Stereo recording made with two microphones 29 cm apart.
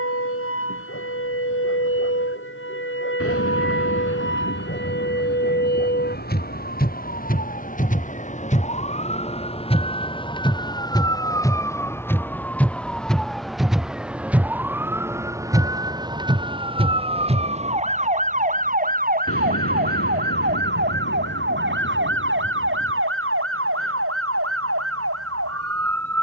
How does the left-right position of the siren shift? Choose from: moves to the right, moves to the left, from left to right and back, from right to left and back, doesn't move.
moves to the right.